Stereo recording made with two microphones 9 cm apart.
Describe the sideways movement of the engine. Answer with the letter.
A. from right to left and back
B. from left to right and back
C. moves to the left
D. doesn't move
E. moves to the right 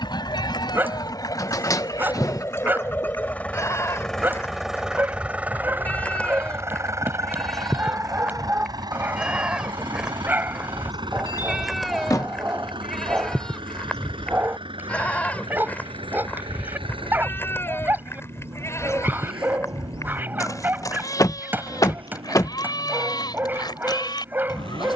E.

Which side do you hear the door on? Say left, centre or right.
left.